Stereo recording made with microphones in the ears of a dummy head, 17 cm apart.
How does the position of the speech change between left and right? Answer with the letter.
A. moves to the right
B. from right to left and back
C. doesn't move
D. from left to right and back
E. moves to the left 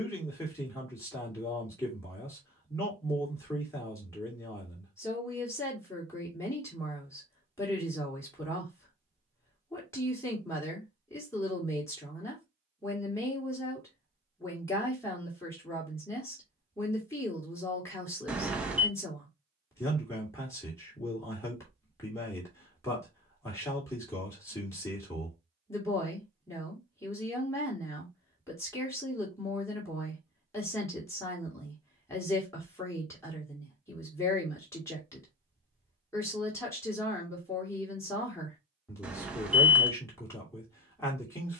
C.